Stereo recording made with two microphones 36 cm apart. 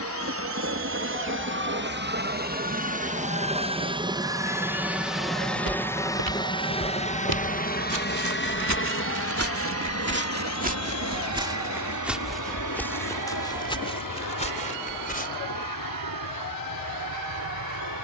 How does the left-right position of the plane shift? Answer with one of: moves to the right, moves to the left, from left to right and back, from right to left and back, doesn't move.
moves to the left.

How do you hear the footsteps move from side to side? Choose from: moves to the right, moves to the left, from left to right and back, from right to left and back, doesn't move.
moves to the left.